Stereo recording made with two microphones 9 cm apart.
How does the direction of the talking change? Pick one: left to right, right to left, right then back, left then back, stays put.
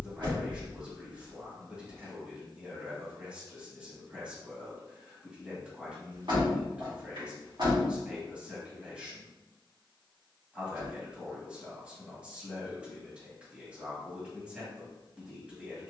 stays put.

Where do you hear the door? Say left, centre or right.
right.